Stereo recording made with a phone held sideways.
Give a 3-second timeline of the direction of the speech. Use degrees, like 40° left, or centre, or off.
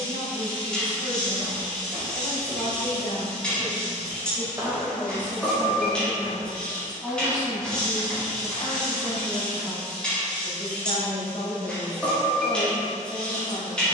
40° left, 10° left, 20° left, 40° left, 40° left.